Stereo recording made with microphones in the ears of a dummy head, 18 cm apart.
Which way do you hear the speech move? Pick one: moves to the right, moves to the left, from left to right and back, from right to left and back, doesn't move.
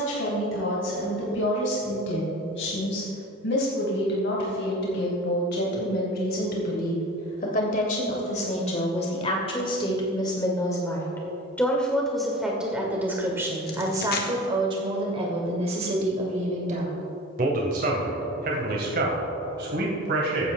moves to the right.